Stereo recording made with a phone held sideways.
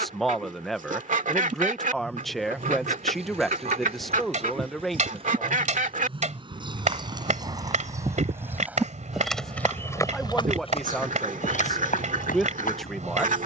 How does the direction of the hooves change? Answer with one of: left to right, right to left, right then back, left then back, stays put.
right to left.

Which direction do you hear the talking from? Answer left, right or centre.
centre.